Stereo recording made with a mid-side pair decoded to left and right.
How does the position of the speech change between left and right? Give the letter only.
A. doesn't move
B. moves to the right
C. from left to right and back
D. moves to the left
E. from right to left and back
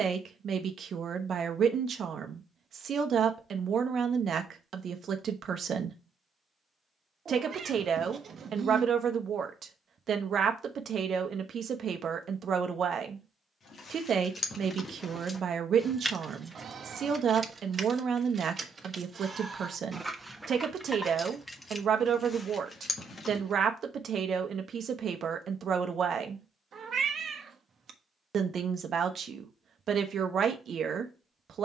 A.